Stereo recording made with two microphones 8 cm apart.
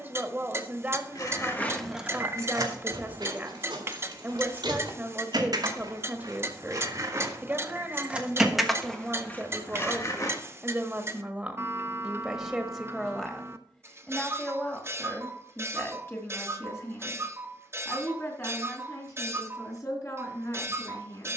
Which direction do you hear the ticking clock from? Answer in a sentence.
In this clip you hear the ticking clock on the right.